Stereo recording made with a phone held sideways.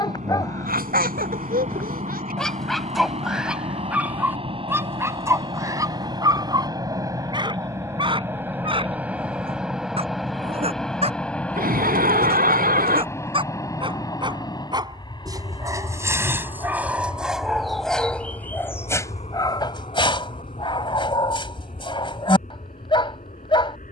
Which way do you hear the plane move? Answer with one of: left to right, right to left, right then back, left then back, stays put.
right to left.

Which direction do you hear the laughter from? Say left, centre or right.
right.